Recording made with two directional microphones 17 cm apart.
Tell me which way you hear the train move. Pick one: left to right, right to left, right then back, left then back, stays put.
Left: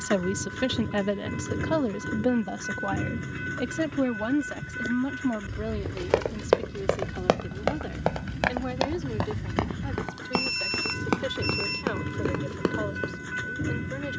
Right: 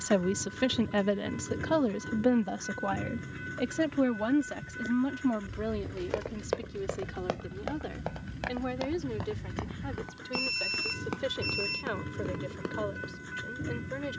stays put.